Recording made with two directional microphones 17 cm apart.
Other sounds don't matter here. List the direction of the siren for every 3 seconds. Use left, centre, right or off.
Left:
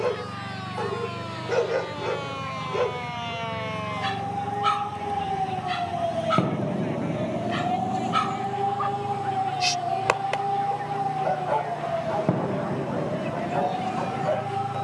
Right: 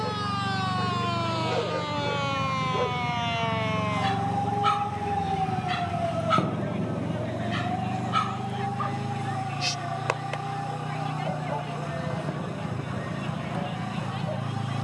right, centre, left, left, left.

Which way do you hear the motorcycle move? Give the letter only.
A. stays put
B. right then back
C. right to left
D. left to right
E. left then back
A.